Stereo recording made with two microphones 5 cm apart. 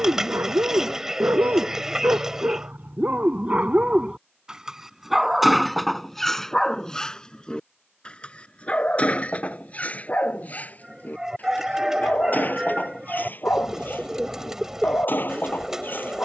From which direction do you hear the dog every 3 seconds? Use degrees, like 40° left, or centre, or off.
50° right, 20° right, 20° left, 30° left, 40° left, 50° left.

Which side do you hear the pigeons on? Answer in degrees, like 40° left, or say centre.
10° right.